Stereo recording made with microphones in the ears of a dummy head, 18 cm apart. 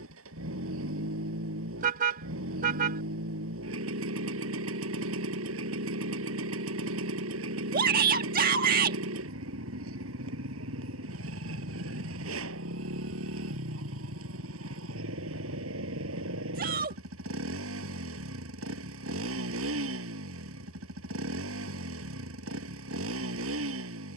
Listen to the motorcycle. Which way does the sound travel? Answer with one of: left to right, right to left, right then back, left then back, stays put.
stays put.